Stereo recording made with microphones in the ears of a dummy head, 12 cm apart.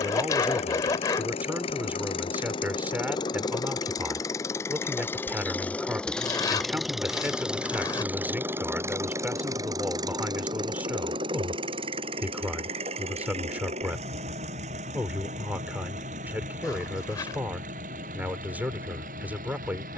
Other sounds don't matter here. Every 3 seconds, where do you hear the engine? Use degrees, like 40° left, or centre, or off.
40° left, 20° left, 10° right, 30° right, 50° right, 60° right, 60° right.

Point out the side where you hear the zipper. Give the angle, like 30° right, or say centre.
30° left.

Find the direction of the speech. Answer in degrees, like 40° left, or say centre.
10° right.